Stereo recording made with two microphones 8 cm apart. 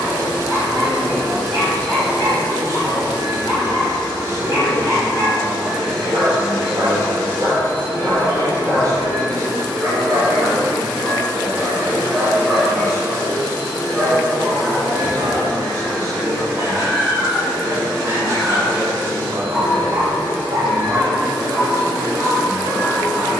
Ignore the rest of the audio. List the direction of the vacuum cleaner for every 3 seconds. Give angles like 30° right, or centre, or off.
70° right, 30° right, 20° left, 30° left, 30° left, 30° left, 30° left, 30° left.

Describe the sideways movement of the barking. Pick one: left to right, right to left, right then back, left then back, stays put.
left then back.